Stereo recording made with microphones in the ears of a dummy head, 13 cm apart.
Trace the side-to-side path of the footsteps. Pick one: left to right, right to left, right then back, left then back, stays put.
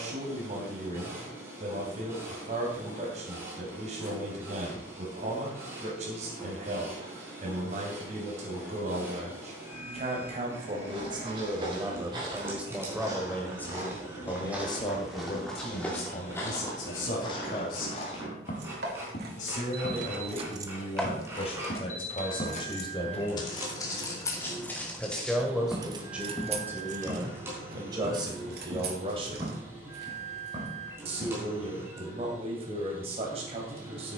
left then back.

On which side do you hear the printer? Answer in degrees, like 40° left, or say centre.
20° right.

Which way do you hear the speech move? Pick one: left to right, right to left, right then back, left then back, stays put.
left then back.